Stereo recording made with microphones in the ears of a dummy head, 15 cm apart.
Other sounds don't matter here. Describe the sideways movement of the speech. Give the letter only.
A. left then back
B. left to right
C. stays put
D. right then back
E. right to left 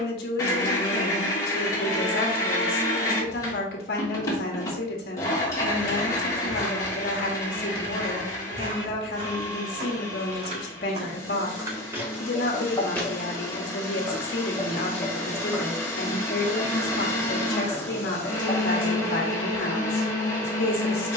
C.